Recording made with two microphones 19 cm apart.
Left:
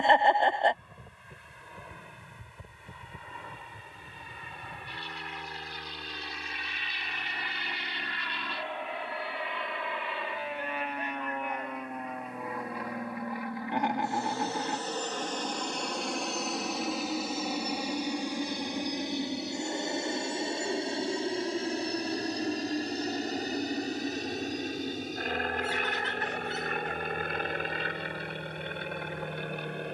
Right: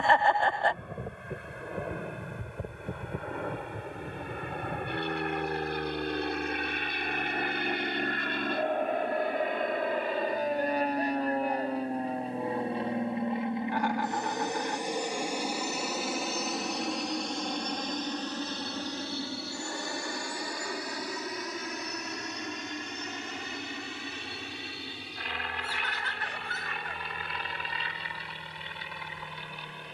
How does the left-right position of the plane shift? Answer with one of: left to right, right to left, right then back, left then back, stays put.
right to left.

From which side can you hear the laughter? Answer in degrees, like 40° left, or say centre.
20° left.